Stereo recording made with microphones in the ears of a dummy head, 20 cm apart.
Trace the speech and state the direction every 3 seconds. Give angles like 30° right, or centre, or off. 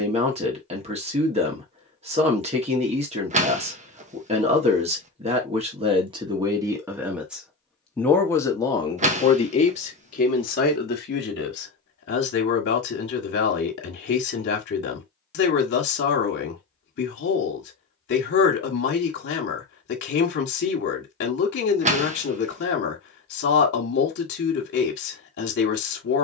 30° right, 30° right, centre, 40° left, 50° left, 50° left, 50° left, 50° left, 50° left.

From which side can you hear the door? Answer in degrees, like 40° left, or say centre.
30° right.